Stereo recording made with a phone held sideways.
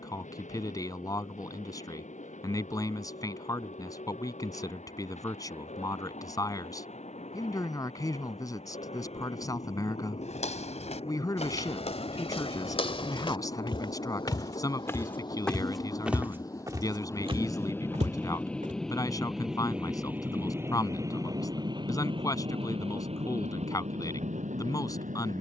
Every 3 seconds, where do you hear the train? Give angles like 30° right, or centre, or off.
60° left, 60° left, 50° left, 50° left, 40° left, 20° left, centre, 40° right, 60° right.